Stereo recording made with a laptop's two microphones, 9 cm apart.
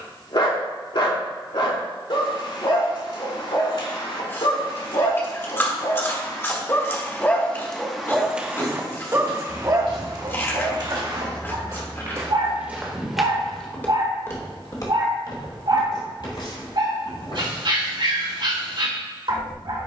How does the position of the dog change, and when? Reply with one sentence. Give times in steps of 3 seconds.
In this clip you hear the dog on the left from 0 s, in the centre from 6 s and on the right from 9 s.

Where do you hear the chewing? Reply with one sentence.
You can hear the chewing on the left.